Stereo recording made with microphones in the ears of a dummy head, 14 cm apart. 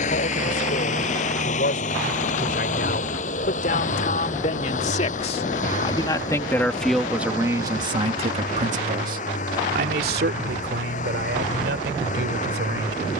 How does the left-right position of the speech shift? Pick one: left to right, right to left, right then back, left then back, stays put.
left to right.